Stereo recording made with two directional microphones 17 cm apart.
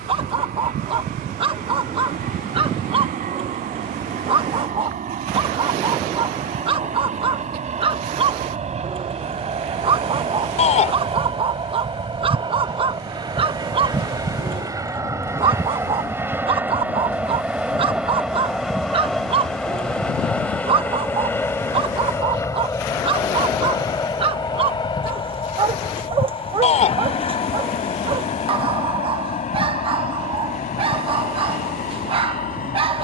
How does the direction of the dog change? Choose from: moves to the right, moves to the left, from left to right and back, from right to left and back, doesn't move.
doesn't move.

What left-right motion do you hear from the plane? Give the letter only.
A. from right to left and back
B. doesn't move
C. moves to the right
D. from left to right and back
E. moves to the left
E.